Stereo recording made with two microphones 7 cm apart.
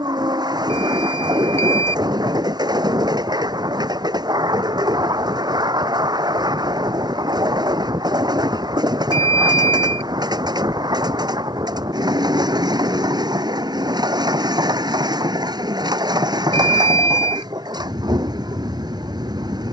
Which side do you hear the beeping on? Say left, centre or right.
left.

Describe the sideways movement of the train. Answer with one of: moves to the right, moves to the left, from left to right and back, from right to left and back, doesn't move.
doesn't move.